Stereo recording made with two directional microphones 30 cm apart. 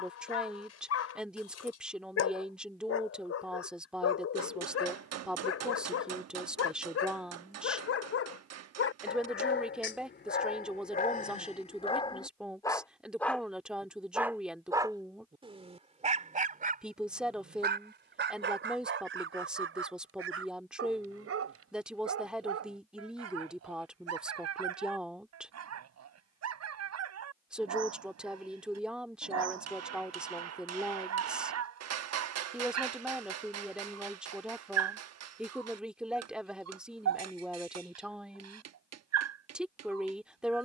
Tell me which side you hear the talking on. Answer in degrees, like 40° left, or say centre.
centre.